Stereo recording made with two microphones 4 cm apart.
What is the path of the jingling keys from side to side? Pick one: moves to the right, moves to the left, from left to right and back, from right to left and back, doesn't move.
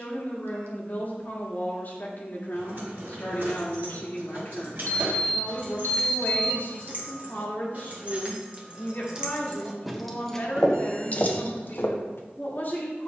moves to the left.